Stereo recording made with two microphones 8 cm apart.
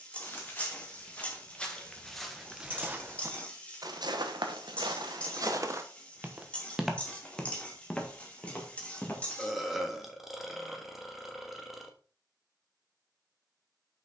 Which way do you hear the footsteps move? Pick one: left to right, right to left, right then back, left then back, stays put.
right then back.